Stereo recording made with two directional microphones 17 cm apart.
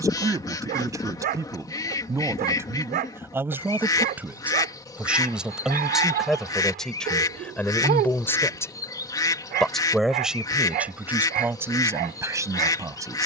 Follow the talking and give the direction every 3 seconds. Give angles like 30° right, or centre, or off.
20° right, 10° right, 10° left, 10° right, 20° right.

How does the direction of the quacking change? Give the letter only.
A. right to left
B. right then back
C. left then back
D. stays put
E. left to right
D.